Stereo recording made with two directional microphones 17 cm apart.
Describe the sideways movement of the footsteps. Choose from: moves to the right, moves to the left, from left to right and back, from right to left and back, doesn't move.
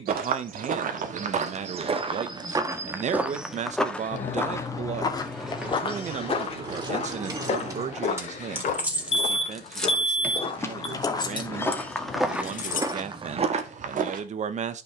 from right to left and back.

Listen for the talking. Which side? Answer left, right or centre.
right.